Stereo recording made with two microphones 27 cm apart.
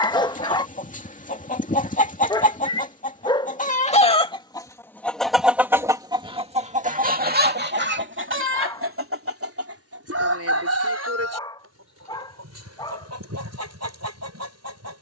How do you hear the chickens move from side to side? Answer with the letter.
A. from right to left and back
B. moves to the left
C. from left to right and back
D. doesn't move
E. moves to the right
E.